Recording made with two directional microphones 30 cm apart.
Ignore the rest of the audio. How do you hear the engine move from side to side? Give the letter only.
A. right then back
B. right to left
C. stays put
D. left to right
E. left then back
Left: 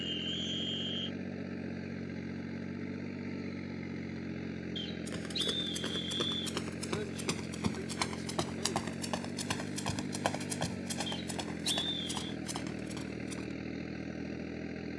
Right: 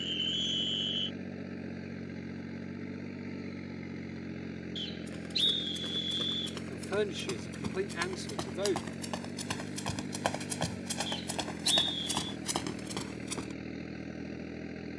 C.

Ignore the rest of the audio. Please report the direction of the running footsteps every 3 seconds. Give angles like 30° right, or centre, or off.
off, 50° left, 30° left, 10° right, 50° right.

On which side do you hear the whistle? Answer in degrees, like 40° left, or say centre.
30° right.